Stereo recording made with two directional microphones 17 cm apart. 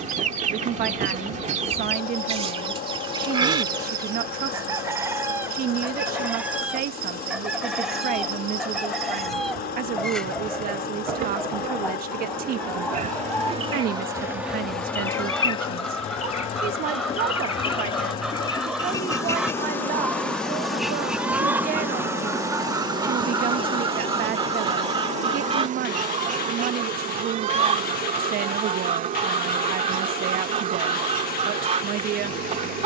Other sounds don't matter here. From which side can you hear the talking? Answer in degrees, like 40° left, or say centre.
60° right.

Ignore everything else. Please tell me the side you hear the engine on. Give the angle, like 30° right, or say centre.
60° left.